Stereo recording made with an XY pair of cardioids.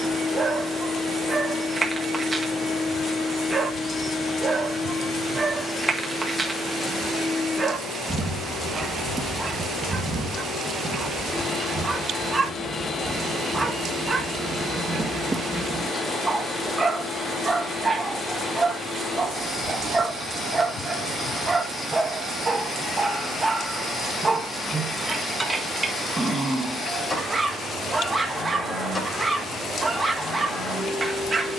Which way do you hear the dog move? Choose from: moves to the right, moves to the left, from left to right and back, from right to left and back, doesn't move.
doesn't move.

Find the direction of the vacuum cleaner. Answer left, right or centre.
left.